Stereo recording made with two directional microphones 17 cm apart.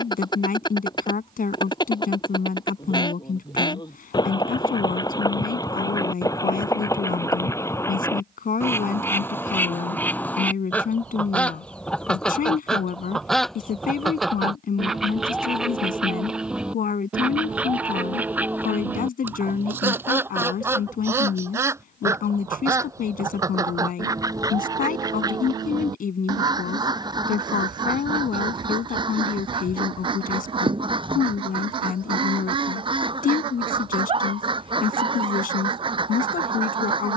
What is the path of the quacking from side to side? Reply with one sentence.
You can hear the quacking go from the left side to the right.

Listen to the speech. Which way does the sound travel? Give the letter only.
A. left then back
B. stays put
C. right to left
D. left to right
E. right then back
B.